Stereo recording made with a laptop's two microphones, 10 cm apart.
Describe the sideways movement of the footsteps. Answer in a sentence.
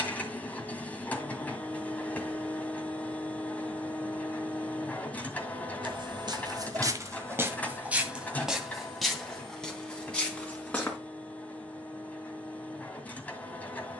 In this clip you hear the footsteps go from the right side to the left.